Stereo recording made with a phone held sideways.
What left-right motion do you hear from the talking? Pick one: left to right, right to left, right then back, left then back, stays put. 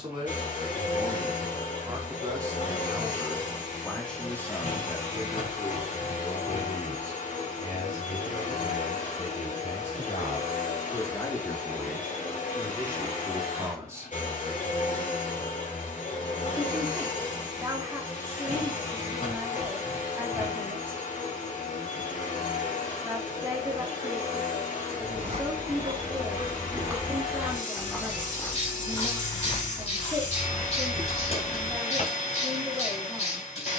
left then back.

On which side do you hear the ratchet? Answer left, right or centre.
left.